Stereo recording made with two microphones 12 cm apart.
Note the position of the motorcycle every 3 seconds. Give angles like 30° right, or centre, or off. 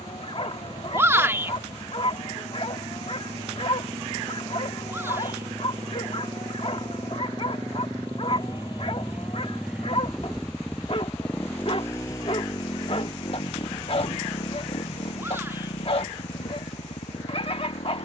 50° right, 50° right, 30° right, centre, 40° left, 70° left.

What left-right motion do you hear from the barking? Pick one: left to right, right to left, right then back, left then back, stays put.
stays put.